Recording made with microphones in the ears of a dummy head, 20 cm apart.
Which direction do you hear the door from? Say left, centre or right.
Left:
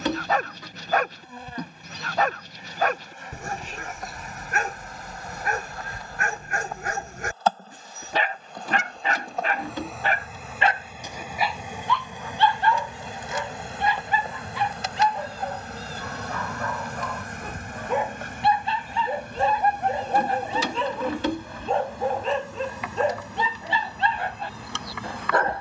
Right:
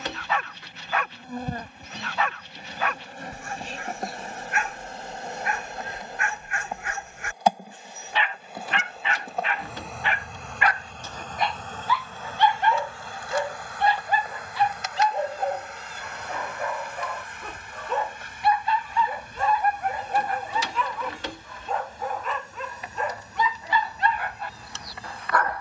left.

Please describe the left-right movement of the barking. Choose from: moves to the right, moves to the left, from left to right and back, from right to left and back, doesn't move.
from left to right and back.